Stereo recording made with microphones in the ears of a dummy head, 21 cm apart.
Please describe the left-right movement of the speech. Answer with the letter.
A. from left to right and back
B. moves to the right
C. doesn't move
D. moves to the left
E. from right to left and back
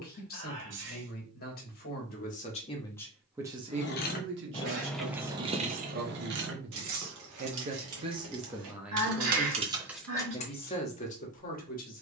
A.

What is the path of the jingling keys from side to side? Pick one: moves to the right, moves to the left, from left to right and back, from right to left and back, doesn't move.
from left to right and back.